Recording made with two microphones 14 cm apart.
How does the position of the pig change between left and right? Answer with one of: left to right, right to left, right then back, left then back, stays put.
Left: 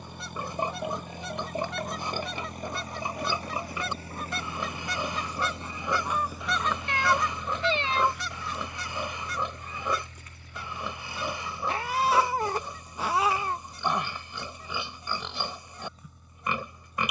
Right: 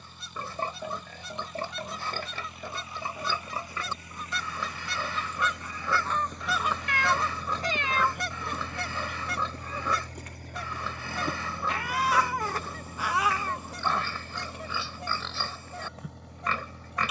stays put.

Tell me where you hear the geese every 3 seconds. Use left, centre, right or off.
left, left, right, right, right, right.